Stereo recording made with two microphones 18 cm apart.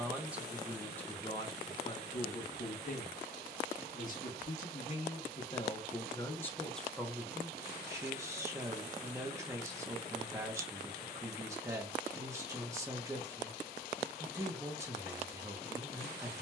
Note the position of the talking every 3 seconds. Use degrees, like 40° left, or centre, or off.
20° left, 40° left, centre, 20° right, 20° right, 20° right.